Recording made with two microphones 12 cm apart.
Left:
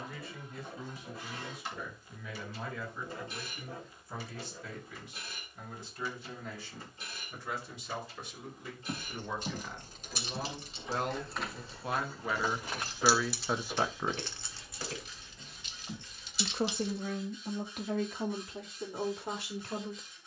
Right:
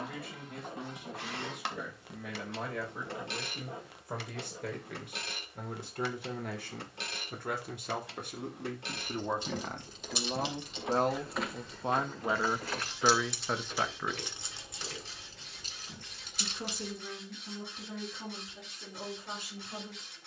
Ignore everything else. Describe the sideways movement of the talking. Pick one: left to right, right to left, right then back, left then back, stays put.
right to left.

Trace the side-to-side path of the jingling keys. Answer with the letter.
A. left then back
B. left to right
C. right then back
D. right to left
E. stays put
B.